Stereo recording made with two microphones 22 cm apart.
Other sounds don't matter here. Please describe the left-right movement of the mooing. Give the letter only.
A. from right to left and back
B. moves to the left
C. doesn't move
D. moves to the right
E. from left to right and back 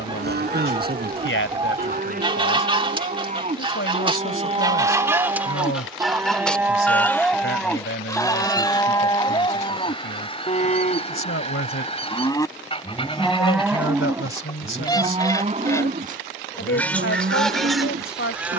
A.